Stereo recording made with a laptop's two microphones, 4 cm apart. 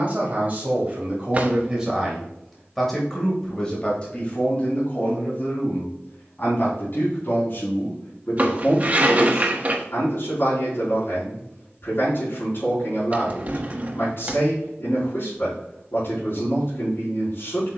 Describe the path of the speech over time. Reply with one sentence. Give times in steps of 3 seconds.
You can hear the speech on the right from 0 s and on the left from 3 s.